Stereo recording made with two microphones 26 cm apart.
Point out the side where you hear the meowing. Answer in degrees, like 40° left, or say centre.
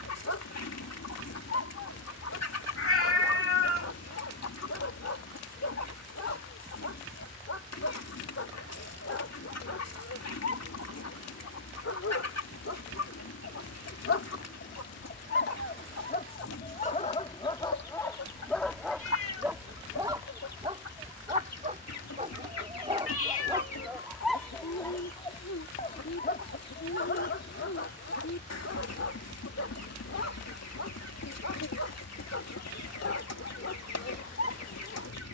60° left.